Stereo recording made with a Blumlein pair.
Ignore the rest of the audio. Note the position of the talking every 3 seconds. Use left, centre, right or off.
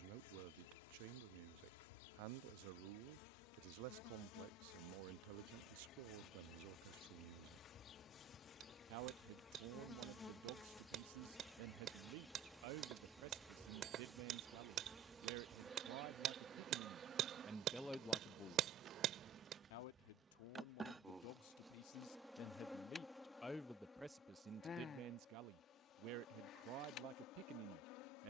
right, right, right, right, right, right, left, left, right, right.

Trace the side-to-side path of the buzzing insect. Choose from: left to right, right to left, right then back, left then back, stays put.
right then back.